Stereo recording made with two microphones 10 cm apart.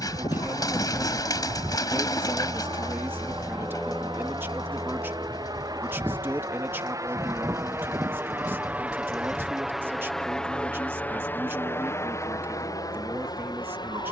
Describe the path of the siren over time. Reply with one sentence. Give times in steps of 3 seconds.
In this clip you hear the siren on the left from 0 s, in the centre from 3 s and on the right from 6 s.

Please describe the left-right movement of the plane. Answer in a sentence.
In this clip you hear the plane move to the left.